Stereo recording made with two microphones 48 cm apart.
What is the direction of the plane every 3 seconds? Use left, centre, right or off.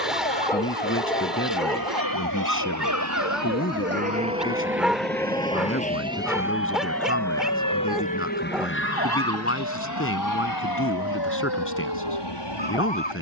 right, right, centre, left, left.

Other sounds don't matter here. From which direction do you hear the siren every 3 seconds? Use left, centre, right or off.
right, centre, left, left, left.